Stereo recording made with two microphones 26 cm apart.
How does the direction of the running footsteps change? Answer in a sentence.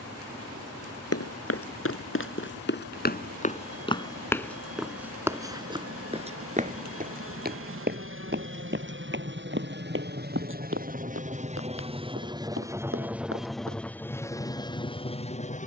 In this clip you hear the running footsteps move from left to right.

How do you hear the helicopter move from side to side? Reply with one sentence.
In this clip you hear the helicopter move to the left.